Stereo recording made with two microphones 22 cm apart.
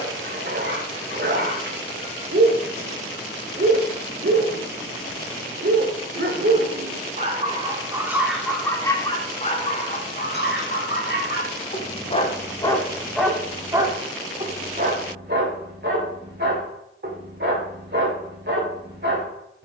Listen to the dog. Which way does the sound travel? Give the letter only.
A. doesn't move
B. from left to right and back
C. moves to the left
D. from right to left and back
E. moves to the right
D.